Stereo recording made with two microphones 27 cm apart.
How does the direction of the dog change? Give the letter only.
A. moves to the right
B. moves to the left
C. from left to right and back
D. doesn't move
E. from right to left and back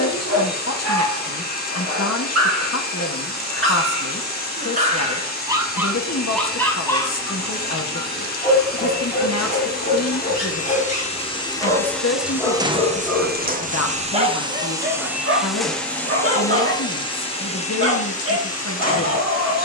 E.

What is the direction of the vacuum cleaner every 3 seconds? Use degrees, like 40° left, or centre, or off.
30° left, 30° left, 30° left, 30° left, 20° right, 10° left, 30° left.